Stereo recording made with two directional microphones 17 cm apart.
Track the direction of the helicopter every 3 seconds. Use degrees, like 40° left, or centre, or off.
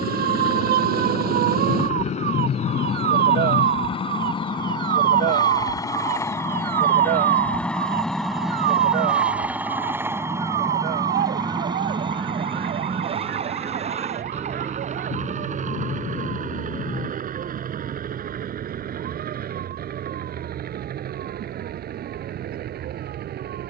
50° left, 30° left, 10° left, 20° right, 30° right, 50° right, 60° right, 60° right.